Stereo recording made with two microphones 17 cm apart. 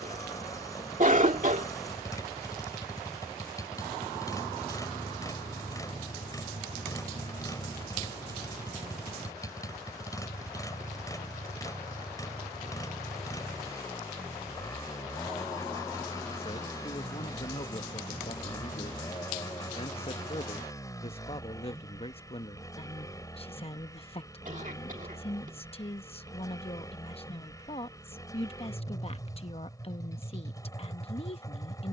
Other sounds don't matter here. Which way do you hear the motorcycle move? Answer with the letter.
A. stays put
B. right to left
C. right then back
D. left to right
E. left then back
A.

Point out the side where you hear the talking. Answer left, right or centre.
left.